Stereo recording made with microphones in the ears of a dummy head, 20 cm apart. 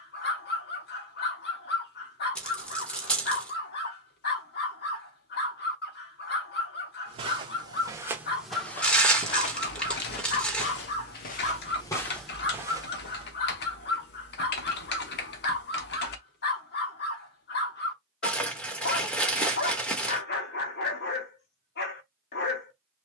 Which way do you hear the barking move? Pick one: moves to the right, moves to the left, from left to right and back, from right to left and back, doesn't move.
doesn't move.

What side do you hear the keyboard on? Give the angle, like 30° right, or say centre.
50° left.